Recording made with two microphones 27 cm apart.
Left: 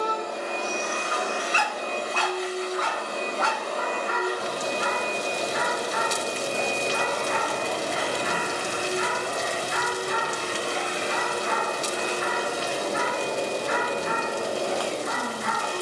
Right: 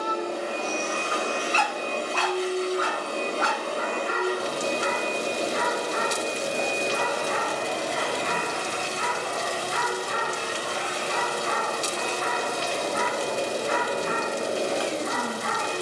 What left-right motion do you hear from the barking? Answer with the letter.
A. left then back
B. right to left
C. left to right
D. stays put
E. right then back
C.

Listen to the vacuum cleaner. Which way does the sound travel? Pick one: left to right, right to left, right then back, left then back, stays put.
left then back.